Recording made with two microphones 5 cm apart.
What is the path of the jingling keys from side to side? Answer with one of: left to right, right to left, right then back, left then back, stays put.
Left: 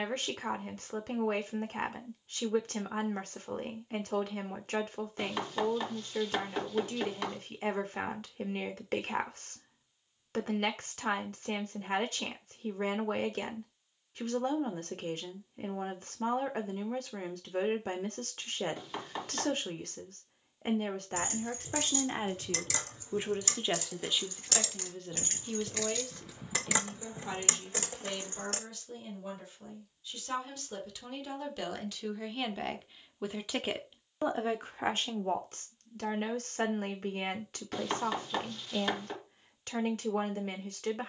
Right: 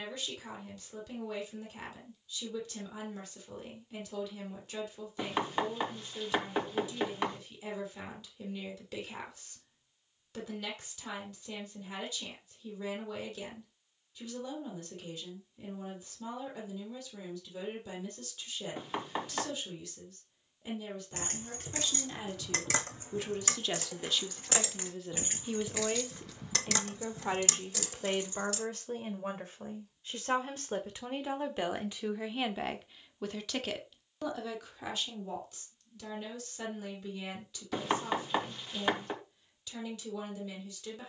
right to left.